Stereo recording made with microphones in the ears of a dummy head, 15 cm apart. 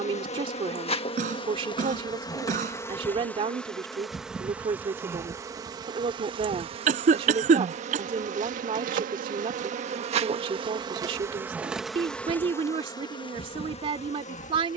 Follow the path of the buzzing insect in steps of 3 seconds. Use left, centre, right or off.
left, centre, right, right, left.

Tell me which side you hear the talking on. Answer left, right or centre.
right.